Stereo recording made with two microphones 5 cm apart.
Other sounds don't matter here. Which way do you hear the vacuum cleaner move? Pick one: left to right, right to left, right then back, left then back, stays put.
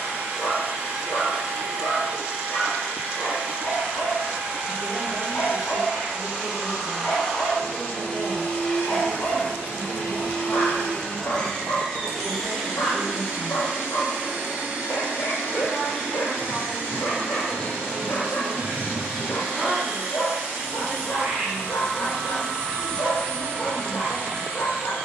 left then back.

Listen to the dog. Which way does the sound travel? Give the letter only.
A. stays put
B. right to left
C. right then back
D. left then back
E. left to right
A.